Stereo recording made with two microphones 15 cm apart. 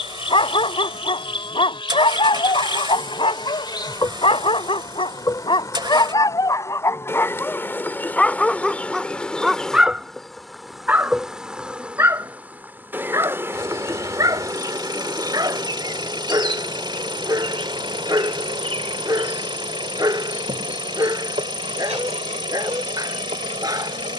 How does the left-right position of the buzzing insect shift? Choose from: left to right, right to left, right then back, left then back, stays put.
left to right.